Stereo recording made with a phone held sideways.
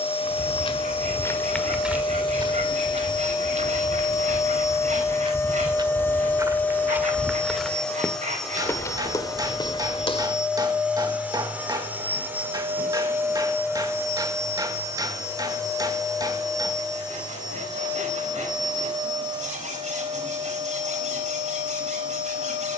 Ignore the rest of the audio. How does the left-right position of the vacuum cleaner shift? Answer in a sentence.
In this clip you hear the vacuum cleaner go from the left side to the right.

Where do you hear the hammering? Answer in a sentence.
You can hear the hammering on the right.